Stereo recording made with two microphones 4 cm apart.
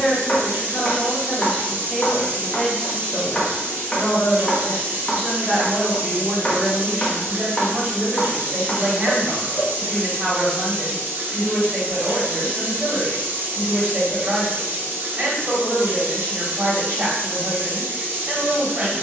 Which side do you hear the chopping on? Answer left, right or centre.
left.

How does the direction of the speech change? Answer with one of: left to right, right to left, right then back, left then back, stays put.
left to right.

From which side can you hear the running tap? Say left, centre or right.
right.